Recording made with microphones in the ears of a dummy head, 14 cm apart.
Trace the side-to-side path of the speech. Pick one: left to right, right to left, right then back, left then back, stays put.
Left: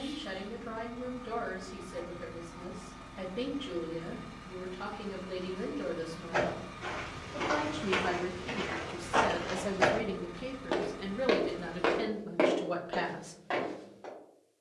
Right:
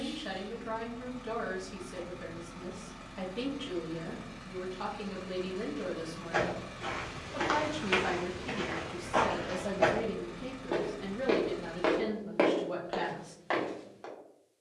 right to left.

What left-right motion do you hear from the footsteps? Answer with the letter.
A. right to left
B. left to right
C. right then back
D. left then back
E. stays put
D.